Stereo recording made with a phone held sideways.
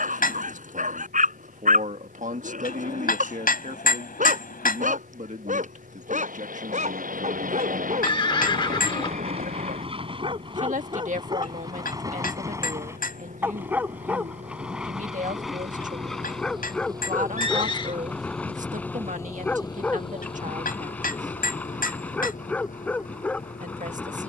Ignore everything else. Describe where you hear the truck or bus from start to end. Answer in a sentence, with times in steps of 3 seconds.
In this clip you hear the truck or bus on the right from 0 s and on the left from 18 s.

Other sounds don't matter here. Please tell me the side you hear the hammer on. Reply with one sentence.
You can hear the hammer on the left.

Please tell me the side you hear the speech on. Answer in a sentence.
In this clip you hear the speech on the right.